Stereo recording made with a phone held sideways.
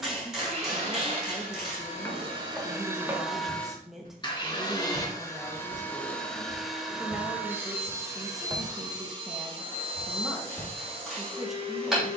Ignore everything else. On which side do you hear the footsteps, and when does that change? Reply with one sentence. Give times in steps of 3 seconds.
You can hear the footsteps in the centre from 0 s, on the right from 3 s and in the centre from 9 s.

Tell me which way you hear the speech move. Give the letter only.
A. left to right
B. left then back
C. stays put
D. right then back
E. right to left
C.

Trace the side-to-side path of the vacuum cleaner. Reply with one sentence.
You can hear the vacuum cleaner move from right to left and back again.